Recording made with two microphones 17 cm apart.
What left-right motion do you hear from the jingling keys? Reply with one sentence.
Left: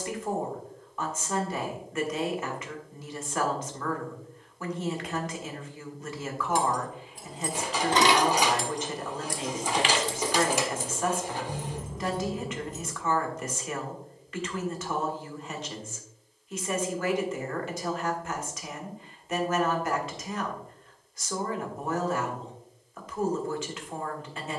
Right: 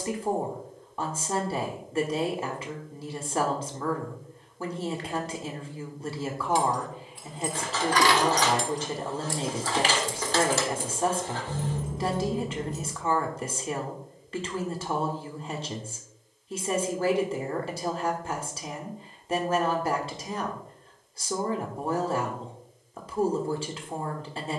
You can hear the jingling keys travel towards the right.